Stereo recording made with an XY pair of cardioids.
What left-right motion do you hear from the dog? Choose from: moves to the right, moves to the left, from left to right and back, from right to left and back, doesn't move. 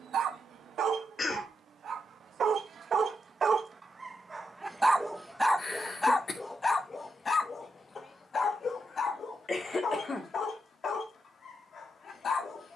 moves to the left.